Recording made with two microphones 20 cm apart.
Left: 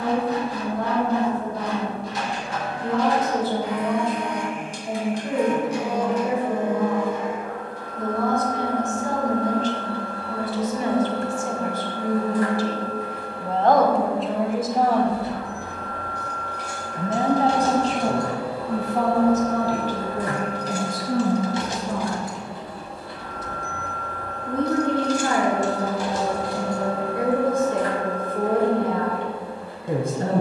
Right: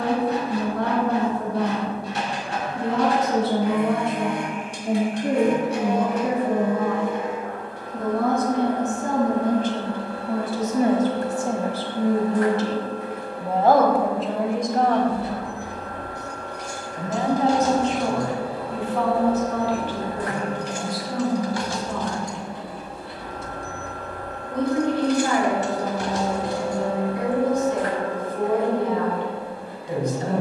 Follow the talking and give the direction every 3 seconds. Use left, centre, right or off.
right, right, right, right, centre, left, left, left, left, left.